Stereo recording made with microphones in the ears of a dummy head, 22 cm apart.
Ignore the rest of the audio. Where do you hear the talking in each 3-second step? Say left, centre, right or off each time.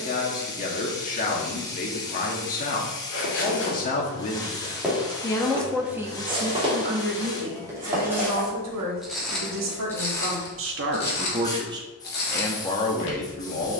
left, left, right, right, left.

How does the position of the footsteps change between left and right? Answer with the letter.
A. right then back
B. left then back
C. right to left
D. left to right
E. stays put
A.